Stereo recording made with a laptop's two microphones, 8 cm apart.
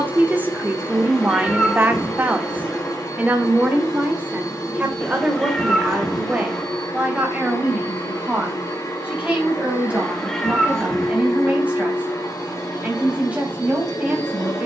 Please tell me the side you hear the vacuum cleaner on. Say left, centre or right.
left.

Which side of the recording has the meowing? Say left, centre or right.
centre.